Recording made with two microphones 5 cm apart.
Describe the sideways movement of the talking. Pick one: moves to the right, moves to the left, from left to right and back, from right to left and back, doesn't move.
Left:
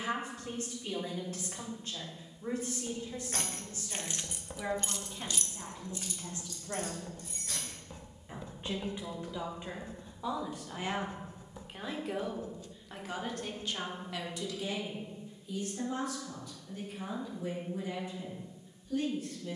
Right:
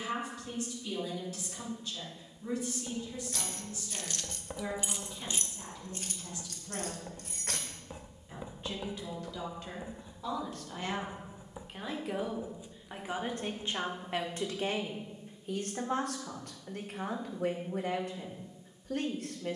moves to the right.